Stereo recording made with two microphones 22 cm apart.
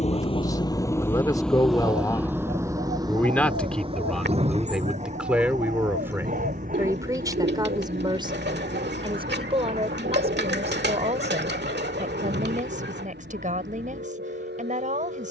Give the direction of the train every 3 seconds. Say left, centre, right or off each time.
centre, right, right, right, right.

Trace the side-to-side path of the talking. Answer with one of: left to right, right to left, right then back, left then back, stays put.
left to right.